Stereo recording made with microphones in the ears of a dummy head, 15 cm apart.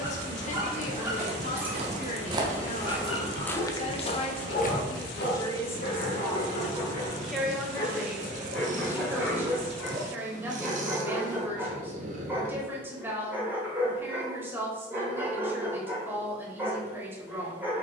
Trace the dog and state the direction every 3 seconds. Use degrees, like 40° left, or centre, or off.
10° right, 60° left, 40° left, 10° right, 10° right, 10° right.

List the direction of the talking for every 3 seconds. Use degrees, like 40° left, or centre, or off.
50° left, 30° left, centre, 10° right, 10° right, 10° right.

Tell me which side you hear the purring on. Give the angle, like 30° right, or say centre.
50° right.